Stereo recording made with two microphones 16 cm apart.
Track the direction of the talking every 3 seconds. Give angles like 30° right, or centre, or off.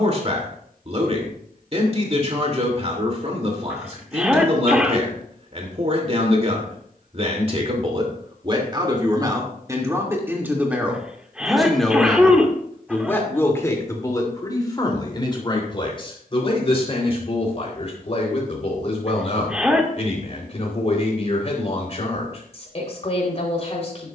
40° right, 40° right, 40° right, 10° right, 20° left, 40° left, 40° left, 40° left.